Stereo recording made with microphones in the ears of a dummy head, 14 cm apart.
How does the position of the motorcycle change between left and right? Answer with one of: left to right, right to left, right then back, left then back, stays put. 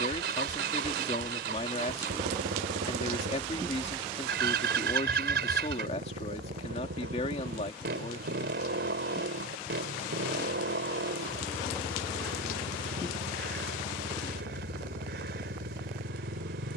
stays put.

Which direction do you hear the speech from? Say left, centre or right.
left.